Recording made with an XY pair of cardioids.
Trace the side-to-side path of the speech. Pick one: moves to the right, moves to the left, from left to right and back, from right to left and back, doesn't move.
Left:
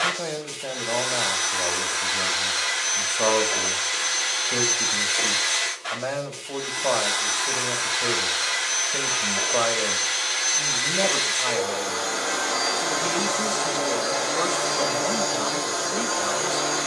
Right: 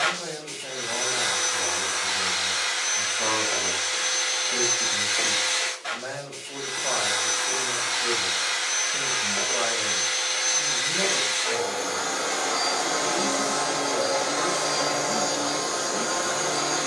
doesn't move.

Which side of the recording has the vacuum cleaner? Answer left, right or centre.
centre.